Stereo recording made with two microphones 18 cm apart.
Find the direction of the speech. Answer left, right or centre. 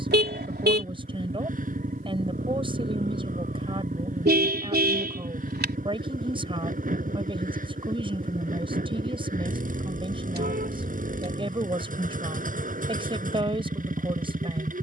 right.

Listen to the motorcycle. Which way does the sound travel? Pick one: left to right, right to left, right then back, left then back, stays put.
stays put.